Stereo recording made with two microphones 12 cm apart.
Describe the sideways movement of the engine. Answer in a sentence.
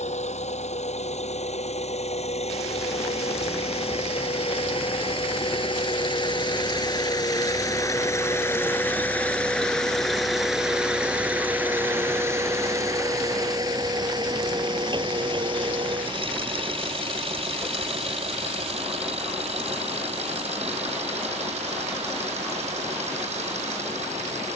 You can hear the engine go from the left side to the right.